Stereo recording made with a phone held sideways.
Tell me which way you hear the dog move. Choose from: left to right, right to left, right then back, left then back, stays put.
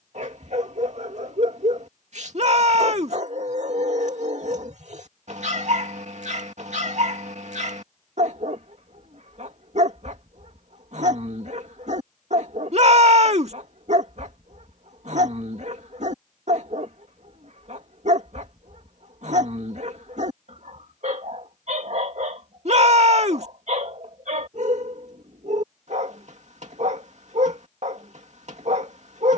stays put.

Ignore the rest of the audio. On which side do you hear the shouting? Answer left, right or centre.
right.